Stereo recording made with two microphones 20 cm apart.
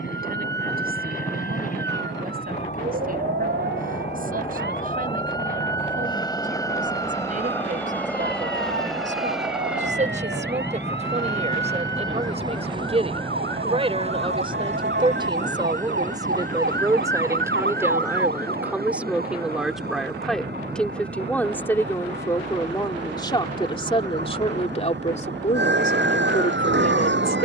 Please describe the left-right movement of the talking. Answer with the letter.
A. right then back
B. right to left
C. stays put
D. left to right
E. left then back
B.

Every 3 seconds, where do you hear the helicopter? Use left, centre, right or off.
left, left, centre, centre, right, right, right, right, right.